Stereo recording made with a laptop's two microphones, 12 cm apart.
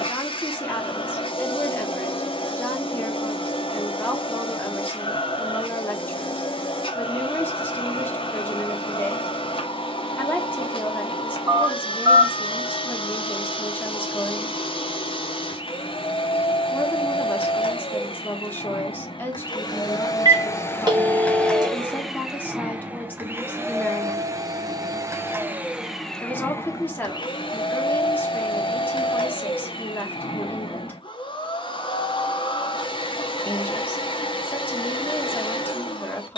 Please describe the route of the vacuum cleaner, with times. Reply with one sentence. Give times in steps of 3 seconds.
In this clip you hear the vacuum cleaner on the left from 0 s, in the centre from 21 s and on the left from 27 s.